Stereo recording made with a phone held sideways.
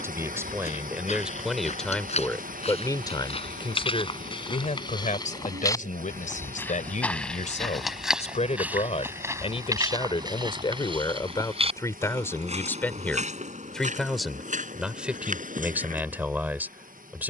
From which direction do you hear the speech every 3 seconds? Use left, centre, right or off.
centre, left, left, left, centre, centre.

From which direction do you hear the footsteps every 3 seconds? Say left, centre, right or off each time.
left, left, centre, right, right, right.